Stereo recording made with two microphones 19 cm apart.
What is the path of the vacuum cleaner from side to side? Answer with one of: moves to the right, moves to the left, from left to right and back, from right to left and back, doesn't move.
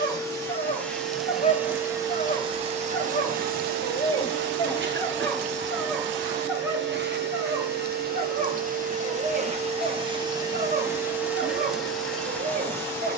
from left to right and back.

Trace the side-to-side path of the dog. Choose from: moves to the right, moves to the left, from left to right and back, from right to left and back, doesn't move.
moves to the right.